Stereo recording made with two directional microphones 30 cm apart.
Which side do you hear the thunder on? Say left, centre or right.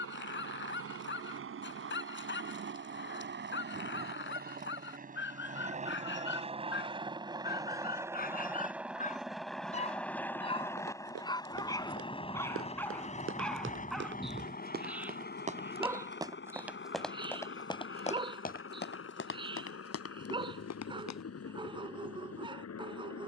centre.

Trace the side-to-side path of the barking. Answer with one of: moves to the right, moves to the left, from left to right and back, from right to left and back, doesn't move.
moves to the right.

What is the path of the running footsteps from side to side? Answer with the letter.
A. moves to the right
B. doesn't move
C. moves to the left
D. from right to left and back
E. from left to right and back
C.